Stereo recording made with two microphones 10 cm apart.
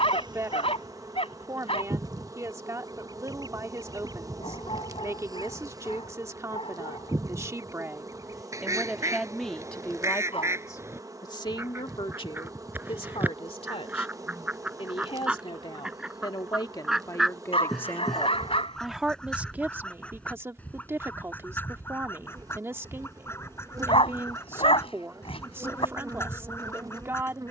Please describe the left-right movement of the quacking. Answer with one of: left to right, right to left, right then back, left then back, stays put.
right to left.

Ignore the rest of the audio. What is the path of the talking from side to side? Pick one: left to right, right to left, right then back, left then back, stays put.
left then back.